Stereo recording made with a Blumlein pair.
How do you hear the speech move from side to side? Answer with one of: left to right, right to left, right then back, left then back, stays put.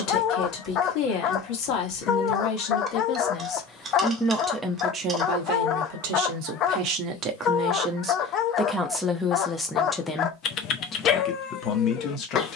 right then back.